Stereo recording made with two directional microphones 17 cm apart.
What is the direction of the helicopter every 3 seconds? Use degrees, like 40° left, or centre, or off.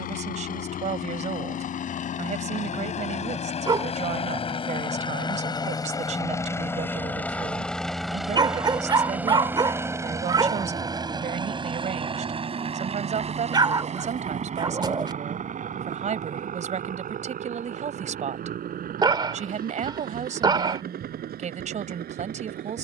50° left, 30° left, 10° left, 20° right, 40° right, 50° right, 60° right, 60° right.